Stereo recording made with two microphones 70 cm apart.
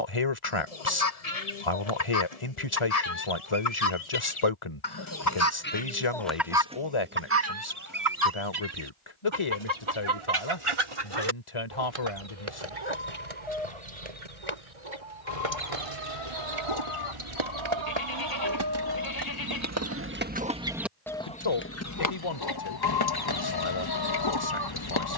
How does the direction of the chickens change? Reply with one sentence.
In this clip you hear the chickens go right and come back.